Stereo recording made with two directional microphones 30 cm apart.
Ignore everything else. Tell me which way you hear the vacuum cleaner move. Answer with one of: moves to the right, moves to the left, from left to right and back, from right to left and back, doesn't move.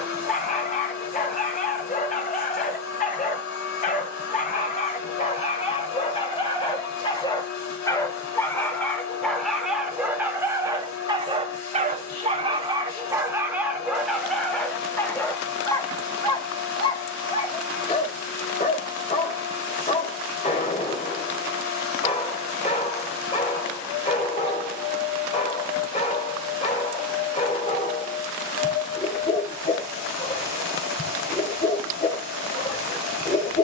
doesn't move.